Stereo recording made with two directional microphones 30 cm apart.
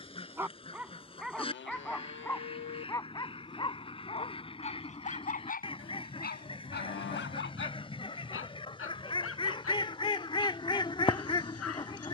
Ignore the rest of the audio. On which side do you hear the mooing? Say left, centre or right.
left.